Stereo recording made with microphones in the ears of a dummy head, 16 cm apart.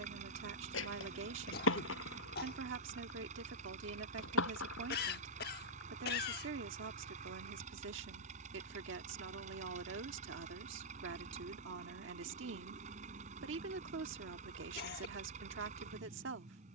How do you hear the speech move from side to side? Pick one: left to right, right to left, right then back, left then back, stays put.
stays put.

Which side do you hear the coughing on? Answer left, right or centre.
left.